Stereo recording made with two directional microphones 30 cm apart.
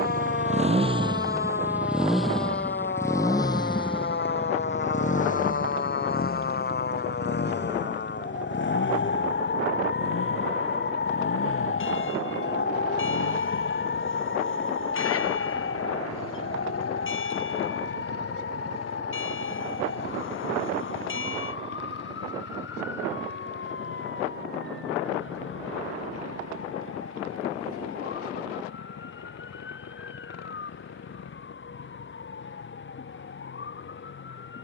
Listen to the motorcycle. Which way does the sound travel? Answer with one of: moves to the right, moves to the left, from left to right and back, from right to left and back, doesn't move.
moves to the left.